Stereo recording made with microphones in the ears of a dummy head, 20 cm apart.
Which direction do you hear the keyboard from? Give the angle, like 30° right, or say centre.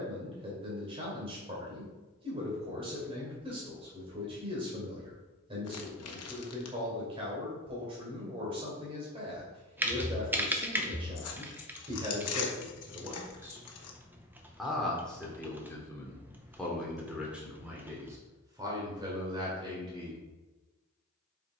10° right.